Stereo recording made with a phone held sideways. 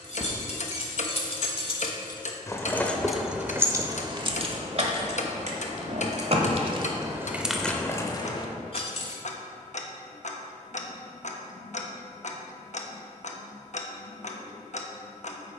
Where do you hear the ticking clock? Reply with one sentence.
In this clip you hear the ticking clock on the left.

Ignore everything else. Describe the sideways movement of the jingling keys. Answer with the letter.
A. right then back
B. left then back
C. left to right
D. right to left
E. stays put
A.